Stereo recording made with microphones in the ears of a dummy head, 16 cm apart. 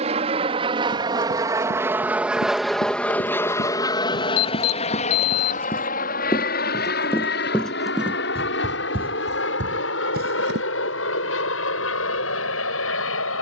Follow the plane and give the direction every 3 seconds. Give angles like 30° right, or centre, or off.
20° right, 30° left, 60° left, 70° left, 70° left.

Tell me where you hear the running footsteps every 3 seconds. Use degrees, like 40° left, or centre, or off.
50° left, 40° left, centre, 50° right, off.